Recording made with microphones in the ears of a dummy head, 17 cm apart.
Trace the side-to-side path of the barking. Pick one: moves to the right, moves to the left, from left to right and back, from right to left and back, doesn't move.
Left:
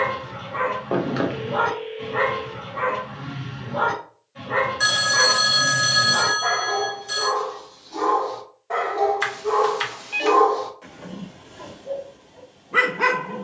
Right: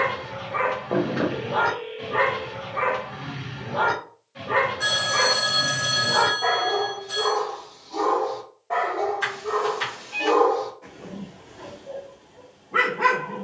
moves to the left.